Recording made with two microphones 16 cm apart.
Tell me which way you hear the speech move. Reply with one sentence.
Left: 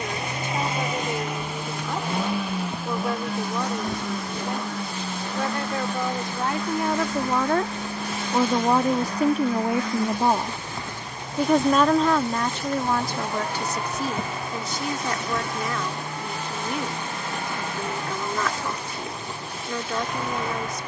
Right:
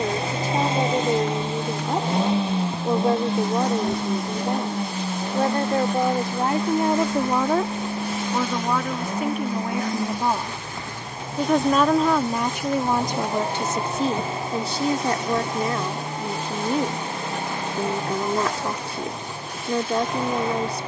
You can hear the speech move from right to left and back again.